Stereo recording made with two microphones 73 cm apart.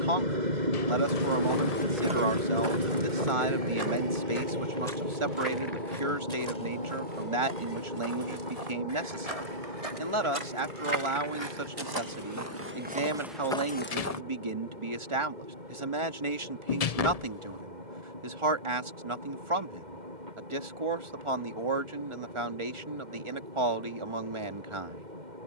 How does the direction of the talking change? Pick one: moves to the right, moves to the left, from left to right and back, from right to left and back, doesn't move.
doesn't move.